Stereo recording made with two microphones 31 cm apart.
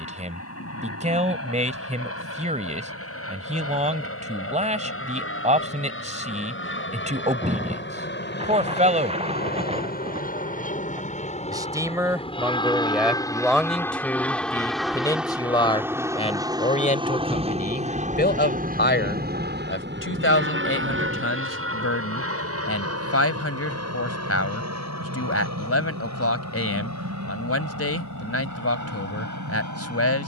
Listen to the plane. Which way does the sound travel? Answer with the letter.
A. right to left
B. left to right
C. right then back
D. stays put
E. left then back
B.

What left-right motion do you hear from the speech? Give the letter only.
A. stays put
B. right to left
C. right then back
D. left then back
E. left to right
B.